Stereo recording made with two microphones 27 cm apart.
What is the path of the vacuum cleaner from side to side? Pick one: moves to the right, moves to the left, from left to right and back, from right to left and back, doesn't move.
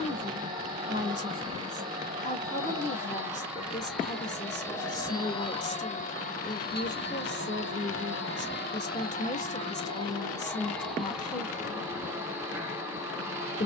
from right to left and back.